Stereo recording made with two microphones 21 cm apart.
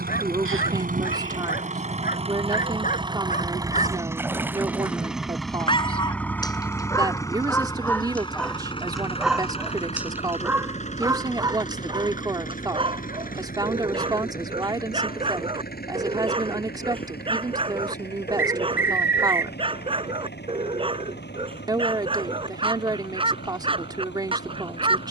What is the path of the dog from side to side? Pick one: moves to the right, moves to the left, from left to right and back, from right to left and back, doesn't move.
moves to the right.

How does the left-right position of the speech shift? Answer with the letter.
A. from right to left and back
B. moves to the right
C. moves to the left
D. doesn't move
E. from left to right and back
D.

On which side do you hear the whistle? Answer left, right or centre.
right.